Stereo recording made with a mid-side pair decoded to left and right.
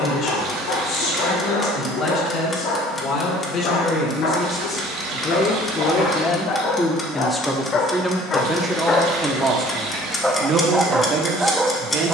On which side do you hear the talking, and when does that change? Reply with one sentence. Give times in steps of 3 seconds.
You can hear the talking on the left from 0 s, in the centre from 6 s and on the right from 9 s.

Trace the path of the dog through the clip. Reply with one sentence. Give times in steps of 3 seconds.
In this clip you hear the dog on the left from 0 s and in the centre from 9 s.